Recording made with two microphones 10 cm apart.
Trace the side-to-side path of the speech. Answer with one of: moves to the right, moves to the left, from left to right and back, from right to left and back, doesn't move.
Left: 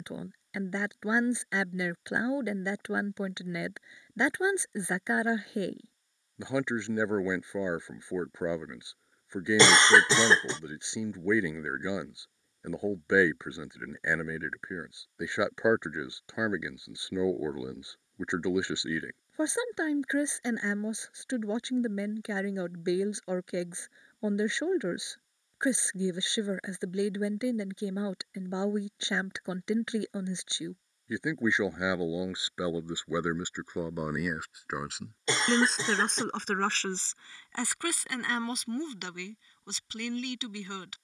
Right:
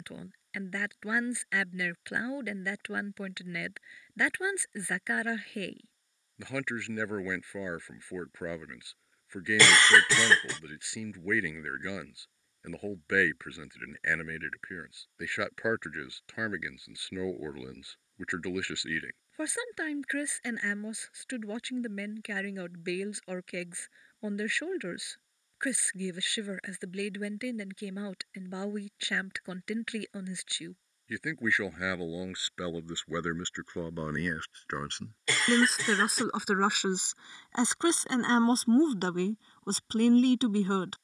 moves to the right.